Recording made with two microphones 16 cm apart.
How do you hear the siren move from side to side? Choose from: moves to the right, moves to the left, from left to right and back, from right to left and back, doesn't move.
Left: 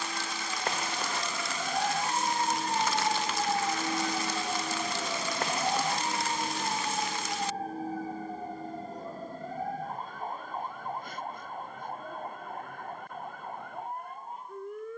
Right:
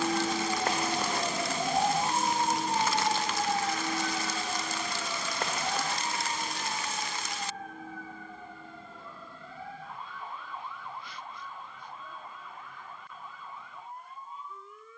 moves to the left.